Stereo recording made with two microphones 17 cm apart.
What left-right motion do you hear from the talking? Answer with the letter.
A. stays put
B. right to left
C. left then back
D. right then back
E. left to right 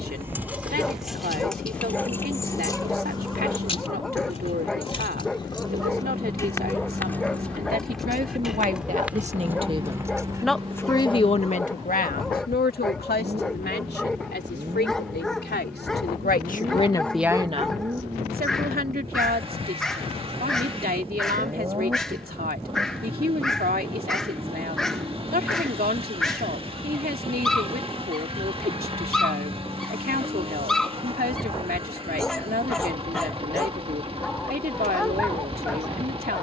C.